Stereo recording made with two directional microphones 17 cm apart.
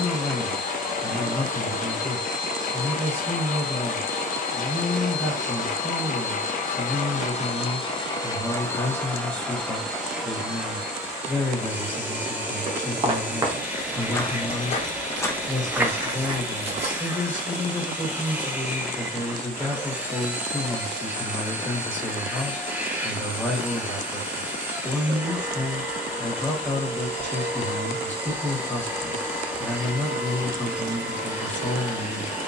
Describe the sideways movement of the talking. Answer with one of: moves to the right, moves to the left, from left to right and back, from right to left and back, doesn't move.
doesn't move.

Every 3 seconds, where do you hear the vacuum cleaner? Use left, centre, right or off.
left, left, left, centre, centre, centre, centre, centre, centre, centre, centre.